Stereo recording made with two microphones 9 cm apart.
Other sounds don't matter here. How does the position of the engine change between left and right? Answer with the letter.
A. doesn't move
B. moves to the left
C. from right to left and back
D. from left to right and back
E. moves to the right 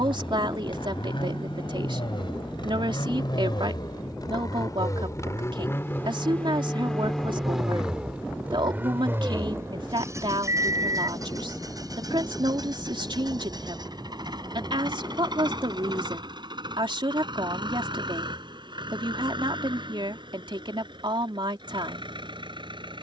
E.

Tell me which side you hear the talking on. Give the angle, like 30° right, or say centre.
70° right.